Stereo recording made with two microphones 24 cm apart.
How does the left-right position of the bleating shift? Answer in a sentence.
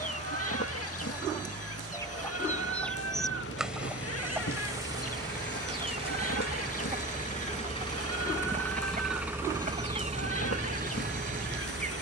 In this clip you hear the bleating stay in one place.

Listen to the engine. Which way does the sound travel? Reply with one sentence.
In this clip you hear the engine move from left to right.